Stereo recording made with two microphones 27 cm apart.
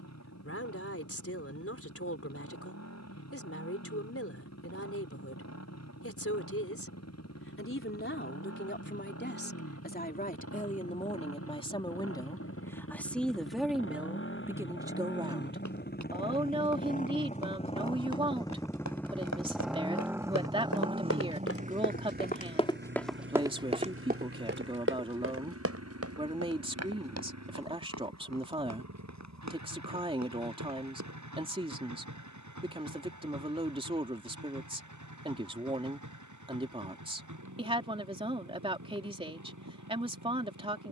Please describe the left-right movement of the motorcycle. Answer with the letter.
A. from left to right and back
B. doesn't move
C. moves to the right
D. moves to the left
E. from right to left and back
C.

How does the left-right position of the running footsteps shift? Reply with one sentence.
In this clip you hear the running footsteps travel towards the right.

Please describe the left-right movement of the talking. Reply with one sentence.
In this clip you hear the talking travel towards the right.